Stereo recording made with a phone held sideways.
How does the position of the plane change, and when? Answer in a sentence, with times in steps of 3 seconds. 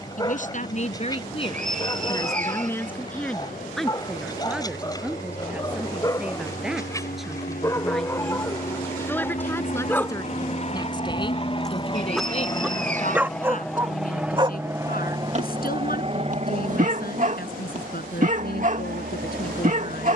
In this clip you hear the plane on the left from 0 s, in the centre from 12 s and on the right from 15 s.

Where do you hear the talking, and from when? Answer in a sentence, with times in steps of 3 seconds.
You can hear the talking on the left from 0 s, in the centre from 3 s and on the left from 9 s.